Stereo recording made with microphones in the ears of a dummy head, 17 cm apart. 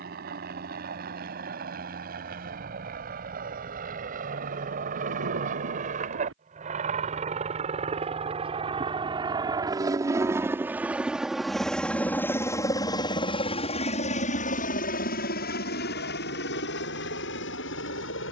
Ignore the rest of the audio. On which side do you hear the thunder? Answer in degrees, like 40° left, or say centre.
70° right.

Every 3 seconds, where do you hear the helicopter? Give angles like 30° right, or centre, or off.
50° right, 50° right, 40° right, 10° right, 30° left, 60° left.